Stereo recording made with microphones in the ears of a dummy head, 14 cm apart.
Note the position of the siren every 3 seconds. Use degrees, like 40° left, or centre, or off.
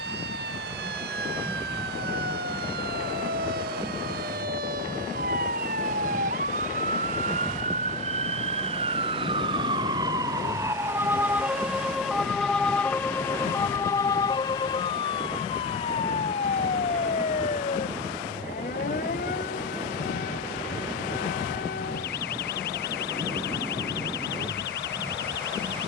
70° right, 60° right, 50° right, 20° right, 20° left, 40° left, 50° left, 60° left, 70° left.